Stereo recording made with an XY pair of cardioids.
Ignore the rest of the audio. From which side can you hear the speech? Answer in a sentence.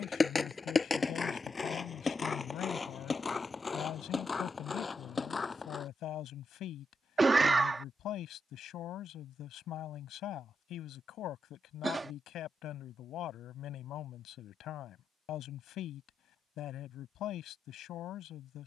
You can hear the speech on the left.